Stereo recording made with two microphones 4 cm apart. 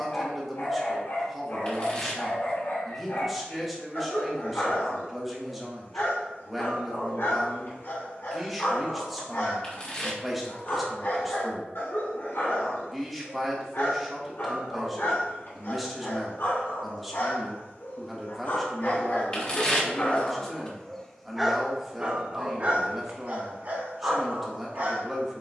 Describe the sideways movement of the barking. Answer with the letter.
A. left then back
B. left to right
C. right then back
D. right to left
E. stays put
B.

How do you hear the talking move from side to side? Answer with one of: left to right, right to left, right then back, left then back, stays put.
stays put.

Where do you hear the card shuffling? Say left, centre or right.
left.